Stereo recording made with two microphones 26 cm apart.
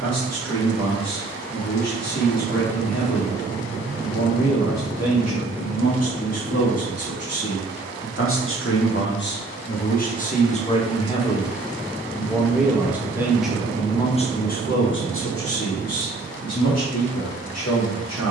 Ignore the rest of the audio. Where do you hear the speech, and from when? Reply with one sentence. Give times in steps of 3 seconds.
In this clip you hear the speech on the left from 0 s, in the centre from 12 s and on the left from 15 s.